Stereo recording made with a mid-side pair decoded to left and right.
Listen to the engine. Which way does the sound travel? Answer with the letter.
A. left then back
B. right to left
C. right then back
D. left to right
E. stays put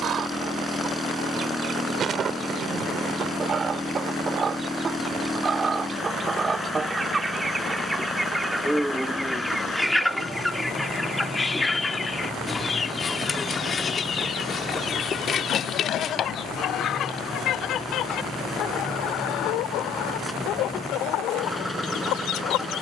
E.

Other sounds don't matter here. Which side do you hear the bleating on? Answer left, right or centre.
left.